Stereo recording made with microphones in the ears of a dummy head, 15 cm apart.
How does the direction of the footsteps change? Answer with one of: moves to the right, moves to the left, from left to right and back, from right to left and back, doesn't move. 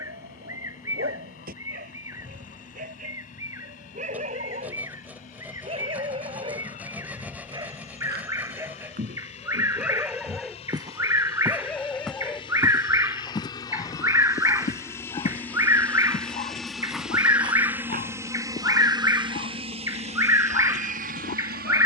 from right to left and back.